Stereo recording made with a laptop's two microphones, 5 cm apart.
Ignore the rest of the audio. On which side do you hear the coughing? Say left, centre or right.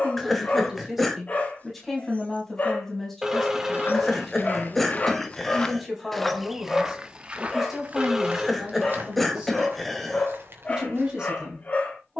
centre.